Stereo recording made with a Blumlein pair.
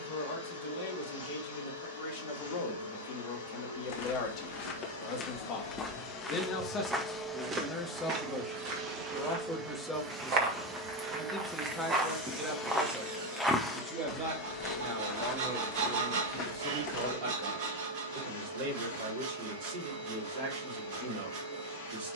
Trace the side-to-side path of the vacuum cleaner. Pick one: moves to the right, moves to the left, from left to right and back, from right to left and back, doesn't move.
from left to right and back.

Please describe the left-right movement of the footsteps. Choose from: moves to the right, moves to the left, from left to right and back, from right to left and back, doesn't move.
from left to right and back.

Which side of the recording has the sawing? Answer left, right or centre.
right.